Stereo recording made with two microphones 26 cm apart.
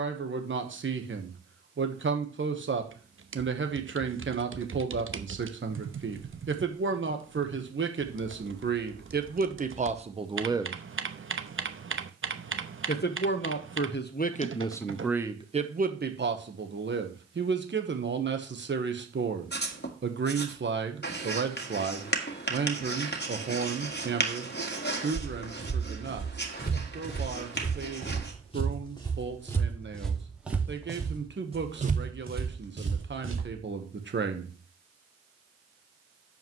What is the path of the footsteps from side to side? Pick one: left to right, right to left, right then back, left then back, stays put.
left to right.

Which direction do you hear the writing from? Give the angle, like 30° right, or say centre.
40° left.